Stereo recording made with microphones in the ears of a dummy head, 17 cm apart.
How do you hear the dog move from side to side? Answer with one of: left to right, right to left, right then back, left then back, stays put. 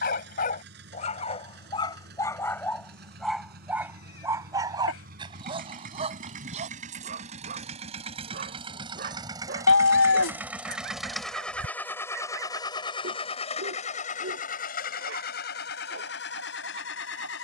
left to right.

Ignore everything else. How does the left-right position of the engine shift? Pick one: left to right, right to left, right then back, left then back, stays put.
right to left.